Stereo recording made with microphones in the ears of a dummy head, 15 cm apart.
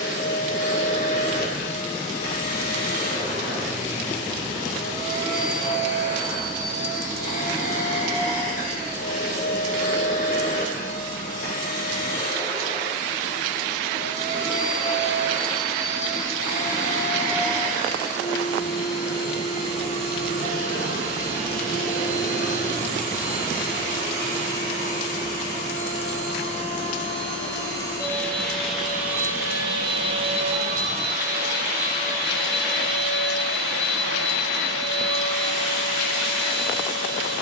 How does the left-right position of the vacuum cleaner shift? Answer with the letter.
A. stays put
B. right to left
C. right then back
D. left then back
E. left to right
E.